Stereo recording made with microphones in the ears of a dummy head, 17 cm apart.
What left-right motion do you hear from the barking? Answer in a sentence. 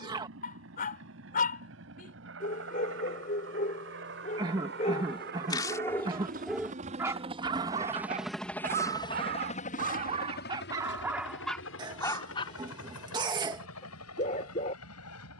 In this clip you hear the barking go right and come back.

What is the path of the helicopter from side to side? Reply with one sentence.
You can hear the helicopter move from right to left.